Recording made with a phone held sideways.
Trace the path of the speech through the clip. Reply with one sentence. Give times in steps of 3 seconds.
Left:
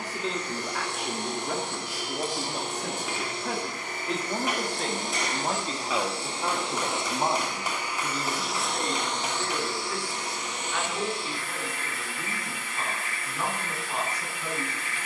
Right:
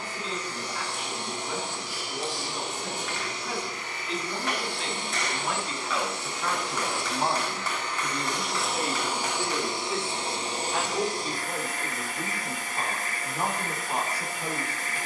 You can hear the speech on the left from 0 s, in the centre from 6 s and on the right from 9 s.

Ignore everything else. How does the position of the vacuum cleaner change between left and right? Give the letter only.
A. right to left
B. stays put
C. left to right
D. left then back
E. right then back
C.